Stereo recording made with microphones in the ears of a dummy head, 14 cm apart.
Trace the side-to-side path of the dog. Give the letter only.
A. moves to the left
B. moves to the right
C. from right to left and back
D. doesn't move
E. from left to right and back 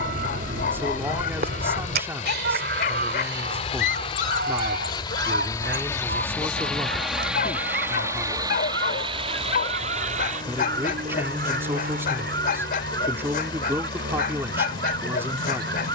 D.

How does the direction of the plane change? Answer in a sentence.
In this clip you hear the plane go from the left side to the right.